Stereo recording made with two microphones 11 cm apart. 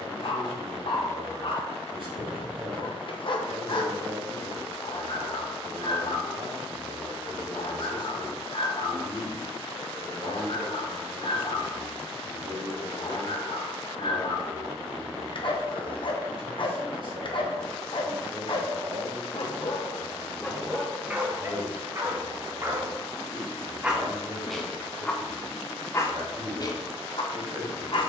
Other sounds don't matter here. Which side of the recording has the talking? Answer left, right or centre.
right.